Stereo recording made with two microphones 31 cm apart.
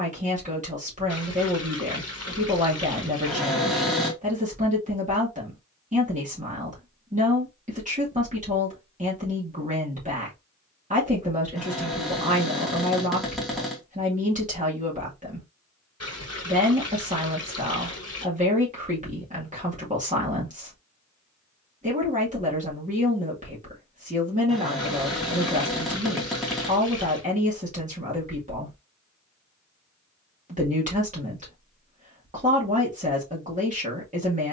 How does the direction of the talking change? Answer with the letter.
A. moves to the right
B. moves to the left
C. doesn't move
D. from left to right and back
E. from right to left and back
C.